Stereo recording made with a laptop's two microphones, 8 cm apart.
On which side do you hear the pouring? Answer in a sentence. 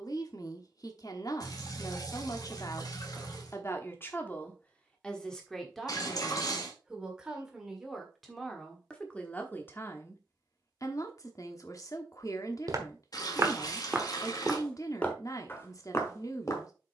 In this clip you hear the pouring on the left.